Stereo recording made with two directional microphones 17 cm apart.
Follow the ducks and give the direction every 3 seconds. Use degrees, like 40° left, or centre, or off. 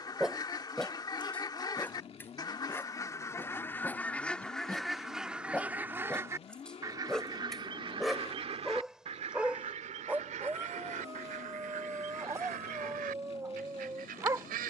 20° left, centre, 30° right, 50° right, 60° right.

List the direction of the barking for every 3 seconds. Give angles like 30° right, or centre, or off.
10° left, 10° left, centre, 10° right, 20° right.